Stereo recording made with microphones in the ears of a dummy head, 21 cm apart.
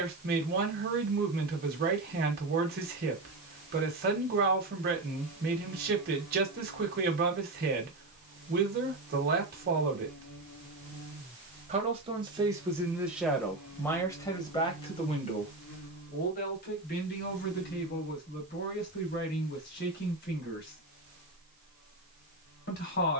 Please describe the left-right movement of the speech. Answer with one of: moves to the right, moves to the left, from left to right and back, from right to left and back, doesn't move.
moves to the left.